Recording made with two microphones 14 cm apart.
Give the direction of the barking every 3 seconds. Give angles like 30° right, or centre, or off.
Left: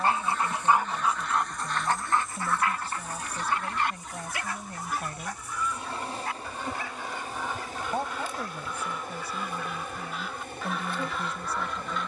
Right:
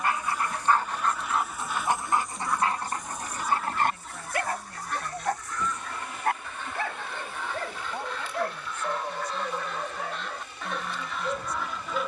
centre, 50° right, 60° right, 70° right.